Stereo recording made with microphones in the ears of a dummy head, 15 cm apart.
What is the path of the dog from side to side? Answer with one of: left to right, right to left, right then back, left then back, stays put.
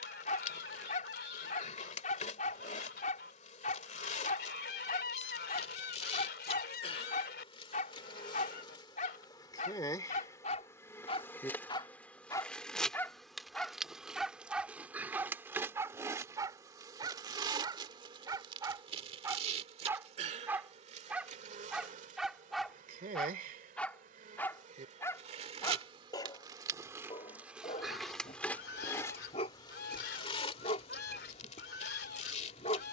right then back.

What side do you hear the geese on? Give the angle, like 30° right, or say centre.
70° left.